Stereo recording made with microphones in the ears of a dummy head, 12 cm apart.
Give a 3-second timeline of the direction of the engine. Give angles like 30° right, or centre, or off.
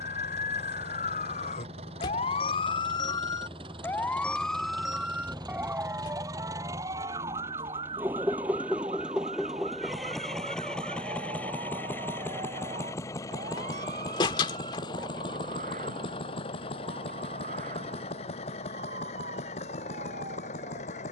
50° right, 40° right, 20° right, centre, 30° left, 40° left, 50° left.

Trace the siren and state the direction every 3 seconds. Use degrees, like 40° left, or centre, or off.
60° left, centre, 30° right, 50° right, 50° right, 60° right, 60° right.